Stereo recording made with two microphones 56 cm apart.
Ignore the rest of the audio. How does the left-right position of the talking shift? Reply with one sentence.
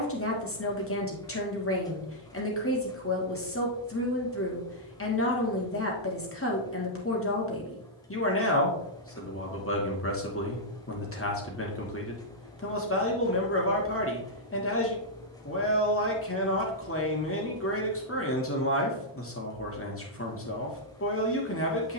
You can hear the talking stay in one place.